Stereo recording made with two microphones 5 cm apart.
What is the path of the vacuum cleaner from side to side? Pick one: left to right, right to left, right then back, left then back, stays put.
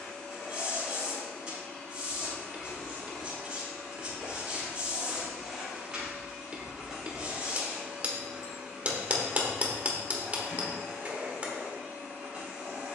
left to right.